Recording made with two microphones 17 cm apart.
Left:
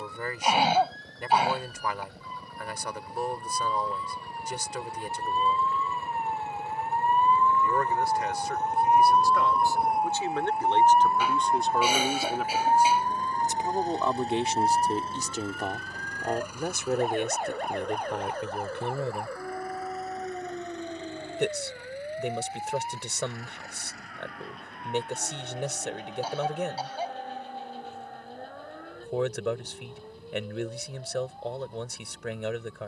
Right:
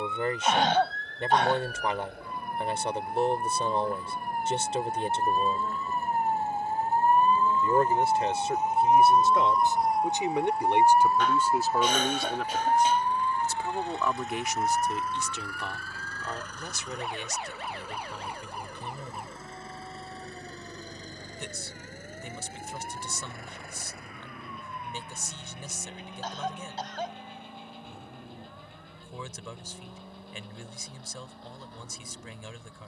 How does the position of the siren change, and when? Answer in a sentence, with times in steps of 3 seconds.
In this clip you hear the siren on the right from 0 s, in the centre from 9 s and on the left from 12 s.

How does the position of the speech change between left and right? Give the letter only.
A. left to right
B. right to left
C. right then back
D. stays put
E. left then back
B.